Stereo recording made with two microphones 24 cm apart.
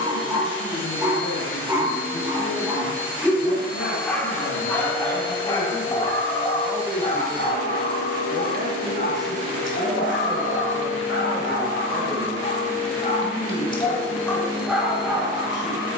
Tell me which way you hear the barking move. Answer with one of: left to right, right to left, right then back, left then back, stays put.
left then back.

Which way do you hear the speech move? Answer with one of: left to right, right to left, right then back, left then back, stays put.
right then back.